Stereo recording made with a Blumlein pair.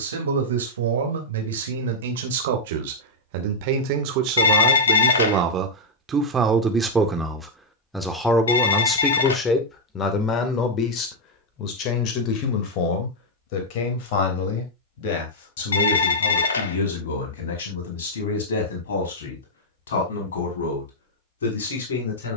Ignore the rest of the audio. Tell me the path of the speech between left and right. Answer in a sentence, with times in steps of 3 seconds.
You can hear the speech on the right from 0 s, in the centre from 6 s and on the left from 9 s.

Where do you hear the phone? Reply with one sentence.
In this clip you hear the phone on the left.